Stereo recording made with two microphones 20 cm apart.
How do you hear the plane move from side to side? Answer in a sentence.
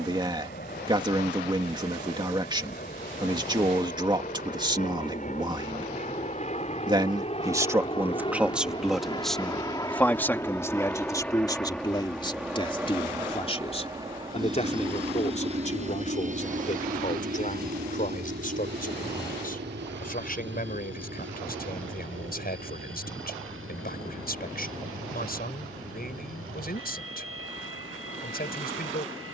In this clip you hear the plane go from the left side to the right.